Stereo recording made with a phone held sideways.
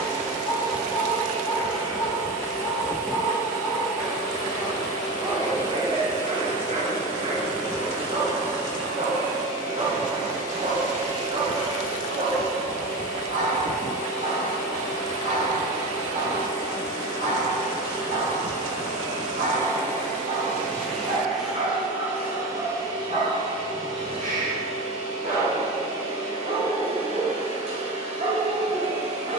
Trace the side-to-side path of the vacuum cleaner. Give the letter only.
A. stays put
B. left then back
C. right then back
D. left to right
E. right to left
D.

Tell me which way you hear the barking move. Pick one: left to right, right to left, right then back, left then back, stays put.
left to right.